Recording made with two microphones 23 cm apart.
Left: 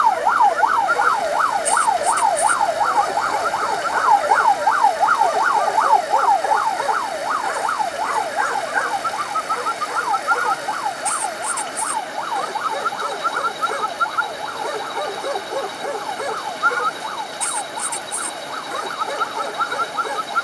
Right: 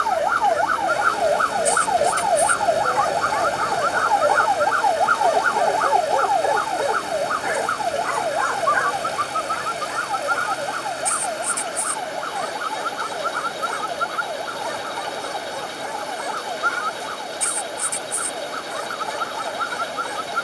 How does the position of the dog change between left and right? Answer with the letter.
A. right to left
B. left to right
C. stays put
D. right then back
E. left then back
D.